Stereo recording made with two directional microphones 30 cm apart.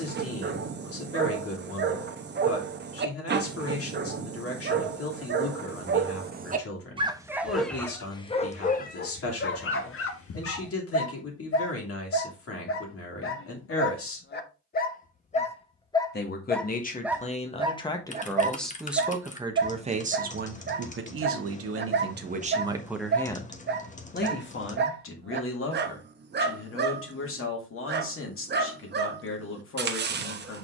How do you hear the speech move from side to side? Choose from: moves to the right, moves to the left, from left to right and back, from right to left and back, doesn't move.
from left to right and back.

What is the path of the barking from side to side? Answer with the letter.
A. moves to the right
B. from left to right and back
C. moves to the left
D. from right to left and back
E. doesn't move
D.